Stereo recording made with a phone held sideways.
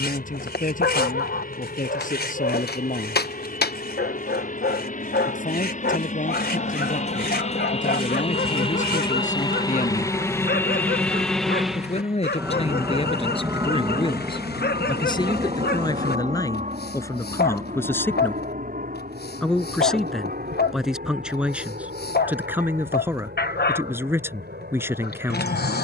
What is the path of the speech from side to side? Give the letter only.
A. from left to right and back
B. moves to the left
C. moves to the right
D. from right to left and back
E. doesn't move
C.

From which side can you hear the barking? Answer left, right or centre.
left.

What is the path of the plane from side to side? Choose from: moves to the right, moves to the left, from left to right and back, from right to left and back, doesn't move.
moves to the right.